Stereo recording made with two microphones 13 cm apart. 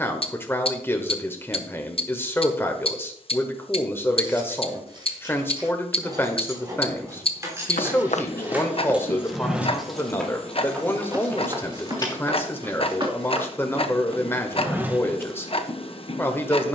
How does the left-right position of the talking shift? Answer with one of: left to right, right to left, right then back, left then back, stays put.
stays put.